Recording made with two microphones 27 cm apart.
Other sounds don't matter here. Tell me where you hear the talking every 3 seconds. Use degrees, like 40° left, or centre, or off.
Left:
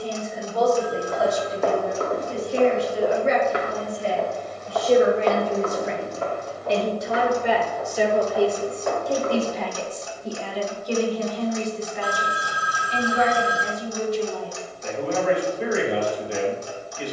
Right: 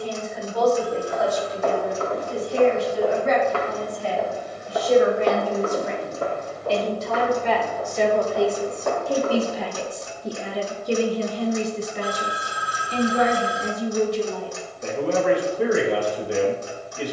40° left, 30° left, 10° left, 20° right, 60° right, 70° right.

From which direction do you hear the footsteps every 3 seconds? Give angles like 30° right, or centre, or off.
50° left, 10° right, 50° right, 60° right, off, off.